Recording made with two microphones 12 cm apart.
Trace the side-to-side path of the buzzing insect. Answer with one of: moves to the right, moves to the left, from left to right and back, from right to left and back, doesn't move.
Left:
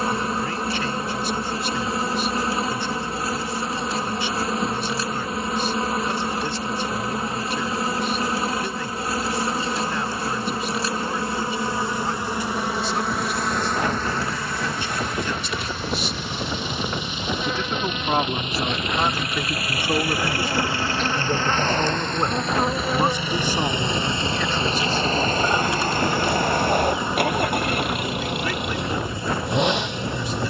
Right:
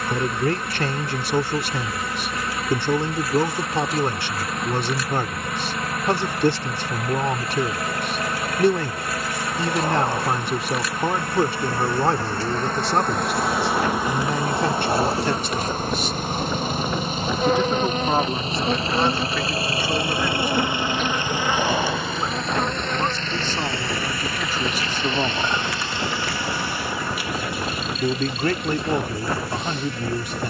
from left to right and back.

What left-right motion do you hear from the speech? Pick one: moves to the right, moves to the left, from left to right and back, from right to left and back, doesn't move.
from right to left and back.